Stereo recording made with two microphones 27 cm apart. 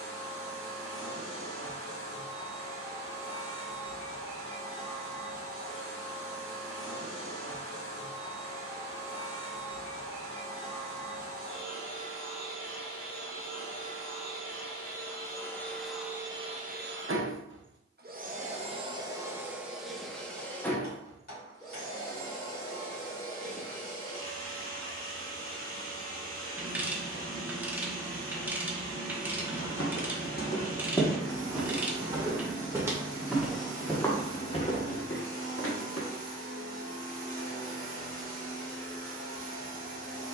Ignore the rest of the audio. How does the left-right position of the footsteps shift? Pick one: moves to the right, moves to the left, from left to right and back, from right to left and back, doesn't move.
from left to right and back.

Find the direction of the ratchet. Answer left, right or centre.
centre.